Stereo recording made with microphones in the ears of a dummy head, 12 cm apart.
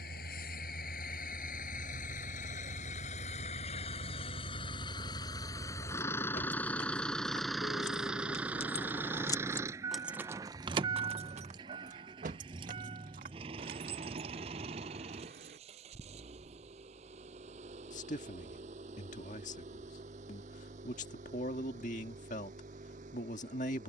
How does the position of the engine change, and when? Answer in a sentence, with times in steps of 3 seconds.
You can hear the engine on the left from 0 s, in the centre from 6 s and on the right from 9 s.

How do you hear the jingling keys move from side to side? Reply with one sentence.
You can hear the jingling keys travel towards the right.